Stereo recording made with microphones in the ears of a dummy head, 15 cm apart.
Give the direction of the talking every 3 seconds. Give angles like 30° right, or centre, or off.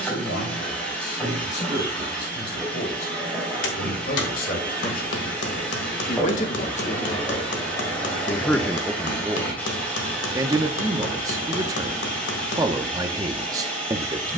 70° left, 60° left, 30° left, 20° right, 20° right.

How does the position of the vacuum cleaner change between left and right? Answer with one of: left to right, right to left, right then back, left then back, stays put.
stays put.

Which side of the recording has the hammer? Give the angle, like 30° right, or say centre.
80° left.